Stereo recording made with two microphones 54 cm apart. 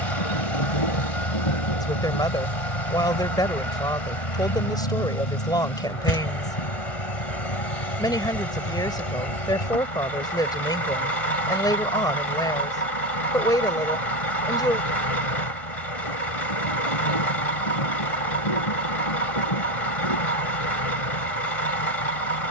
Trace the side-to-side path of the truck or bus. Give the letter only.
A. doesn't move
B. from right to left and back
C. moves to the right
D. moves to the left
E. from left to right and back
A.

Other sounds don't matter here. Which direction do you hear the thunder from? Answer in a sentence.
In this clip you hear the thunder on the left.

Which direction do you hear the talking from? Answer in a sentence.
In this clip you hear the talking in the centre.